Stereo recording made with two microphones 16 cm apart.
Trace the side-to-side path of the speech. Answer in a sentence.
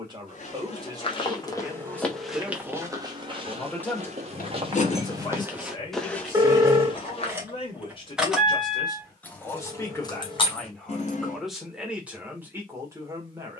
You can hear the speech go left and come back.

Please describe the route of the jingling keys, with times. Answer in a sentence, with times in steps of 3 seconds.
In this clip you hear the jingling keys not at all from 0 s, on the left from 3 s, in the centre from 6 s, on the left from 9 s and not at all from 12 s.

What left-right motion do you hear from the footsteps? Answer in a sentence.
In this clip you hear the footsteps go right and come back.